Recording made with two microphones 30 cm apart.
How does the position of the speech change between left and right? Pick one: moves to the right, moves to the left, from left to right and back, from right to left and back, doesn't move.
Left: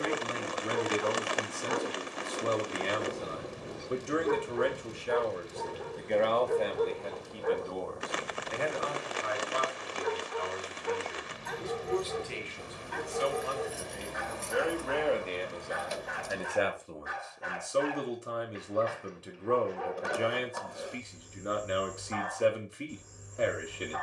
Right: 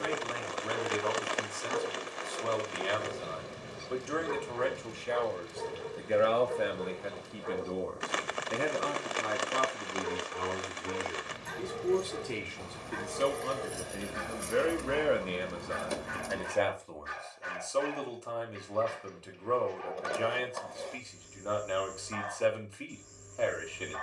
from left to right and back.